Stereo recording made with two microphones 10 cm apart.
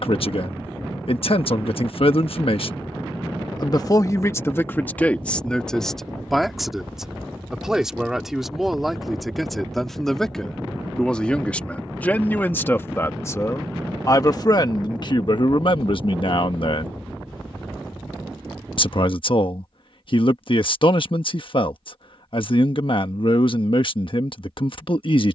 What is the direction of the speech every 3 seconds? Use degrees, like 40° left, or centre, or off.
60° left, 20° left, centre, 10° left, 30° left, 50° left, 60° left, 60° left, 60° left.